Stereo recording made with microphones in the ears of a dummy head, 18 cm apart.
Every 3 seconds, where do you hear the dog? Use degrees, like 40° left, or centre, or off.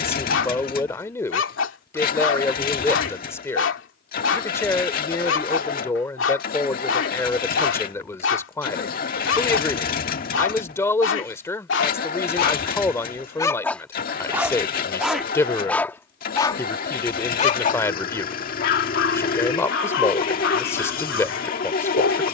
70° left, 70° left, 70° left, 70° left, 10° left, 20° left, 60° left, 70° left.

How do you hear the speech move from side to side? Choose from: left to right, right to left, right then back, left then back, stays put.
stays put.